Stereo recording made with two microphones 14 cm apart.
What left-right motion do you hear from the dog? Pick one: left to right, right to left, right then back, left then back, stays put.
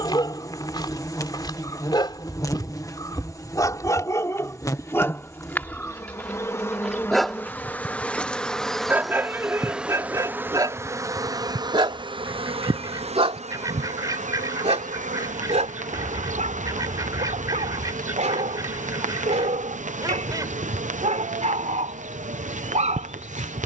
left to right.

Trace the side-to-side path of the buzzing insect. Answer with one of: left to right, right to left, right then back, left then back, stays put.
left to right.